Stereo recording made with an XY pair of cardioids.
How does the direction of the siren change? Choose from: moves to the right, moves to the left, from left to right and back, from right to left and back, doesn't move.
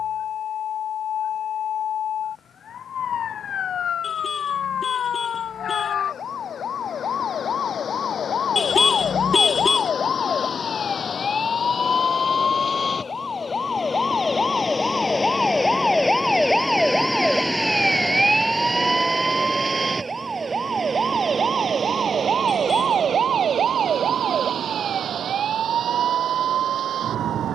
moves to the right.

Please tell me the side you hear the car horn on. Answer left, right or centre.
left.